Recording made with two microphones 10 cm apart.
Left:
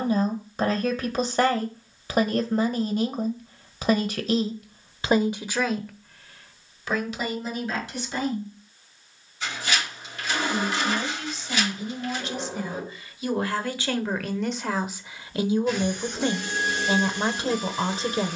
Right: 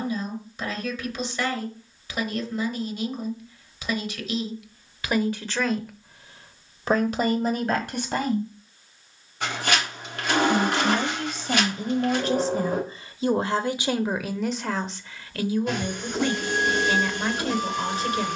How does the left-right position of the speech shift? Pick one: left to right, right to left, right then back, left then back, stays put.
right then back.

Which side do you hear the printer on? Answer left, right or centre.
right.